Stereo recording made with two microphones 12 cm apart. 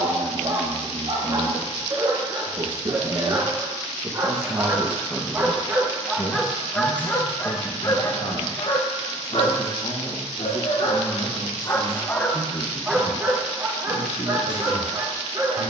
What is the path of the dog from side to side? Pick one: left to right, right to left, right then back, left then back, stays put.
left then back.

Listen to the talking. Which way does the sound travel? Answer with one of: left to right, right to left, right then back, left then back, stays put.
right to left.